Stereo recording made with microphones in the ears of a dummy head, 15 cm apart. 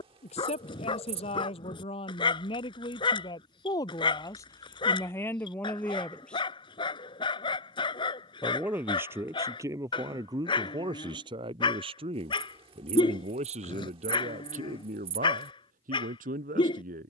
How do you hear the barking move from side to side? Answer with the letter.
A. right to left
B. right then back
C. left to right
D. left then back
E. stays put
E.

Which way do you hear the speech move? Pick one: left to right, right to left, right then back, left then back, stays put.
left to right.